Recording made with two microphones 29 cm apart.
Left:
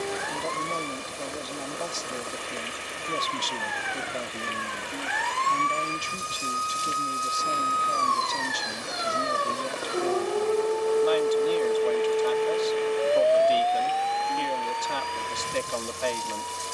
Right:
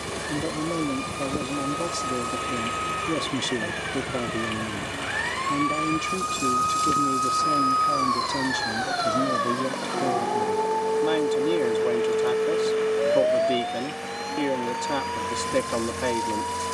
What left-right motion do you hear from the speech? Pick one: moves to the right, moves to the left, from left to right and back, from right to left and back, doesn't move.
doesn't move.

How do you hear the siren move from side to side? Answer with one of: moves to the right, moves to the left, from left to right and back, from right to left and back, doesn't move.
moves to the right.